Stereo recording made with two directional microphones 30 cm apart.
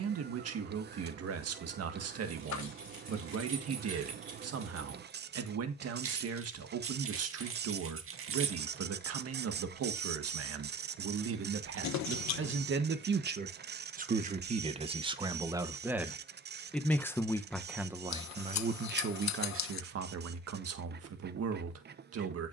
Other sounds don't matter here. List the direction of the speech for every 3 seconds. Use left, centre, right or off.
right, right, right, right, right, centre, right, right.